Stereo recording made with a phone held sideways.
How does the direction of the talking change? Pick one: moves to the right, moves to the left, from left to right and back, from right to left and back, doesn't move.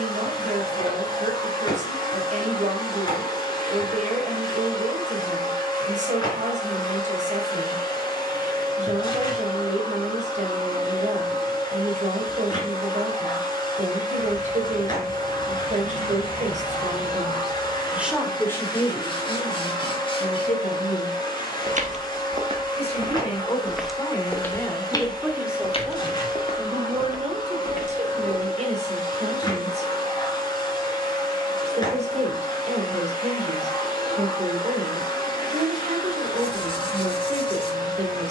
from right to left and back.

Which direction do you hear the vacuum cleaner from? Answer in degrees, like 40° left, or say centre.
30° left.